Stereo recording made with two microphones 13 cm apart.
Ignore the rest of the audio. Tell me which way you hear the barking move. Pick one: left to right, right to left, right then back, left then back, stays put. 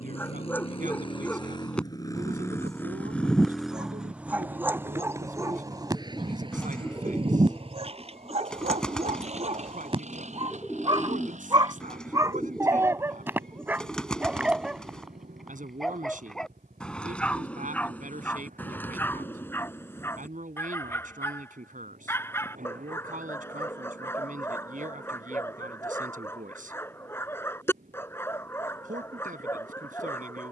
right then back.